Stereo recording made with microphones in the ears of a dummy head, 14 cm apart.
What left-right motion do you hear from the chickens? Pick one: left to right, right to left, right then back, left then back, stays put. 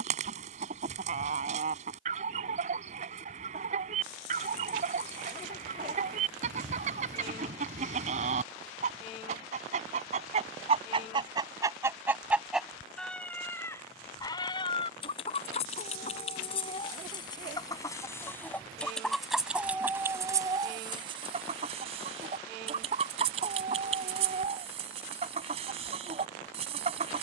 left then back.